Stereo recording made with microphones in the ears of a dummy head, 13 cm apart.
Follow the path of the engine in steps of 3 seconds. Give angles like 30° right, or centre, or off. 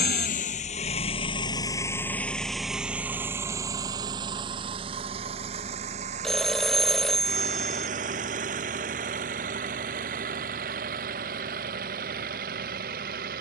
30° left, 30° right, 50° right, 60° right, 60° right.